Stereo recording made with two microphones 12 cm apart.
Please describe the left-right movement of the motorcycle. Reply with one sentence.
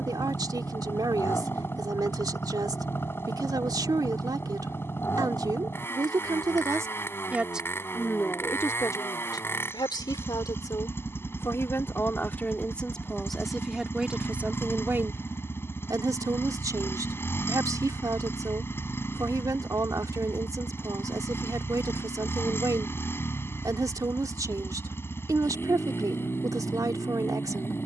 In this clip you hear the motorcycle stay put.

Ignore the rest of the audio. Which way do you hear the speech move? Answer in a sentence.
In this clip you hear the speech go left and come back.